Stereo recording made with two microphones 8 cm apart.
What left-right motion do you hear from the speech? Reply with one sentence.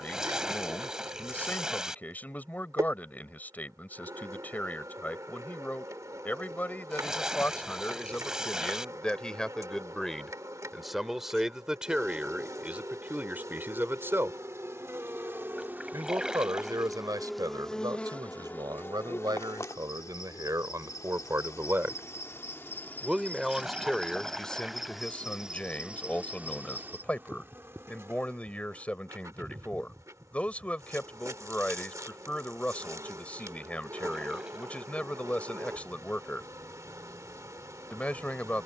In this clip you hear the speech move from left to right and back again.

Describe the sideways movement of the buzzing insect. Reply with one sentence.
You can hear the buzzing insect move from right to left and back again.